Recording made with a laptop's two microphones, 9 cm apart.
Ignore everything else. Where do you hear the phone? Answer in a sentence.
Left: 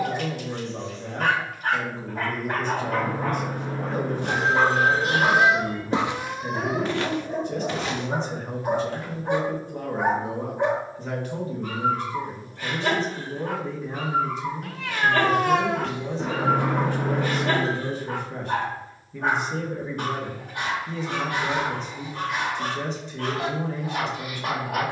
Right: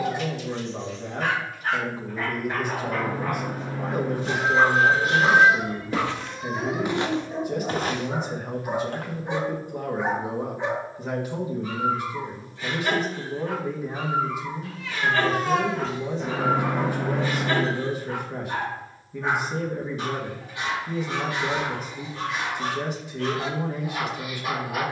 In this clip you hear the phone on the left.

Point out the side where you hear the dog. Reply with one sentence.
In this clip you hear the dog on the left.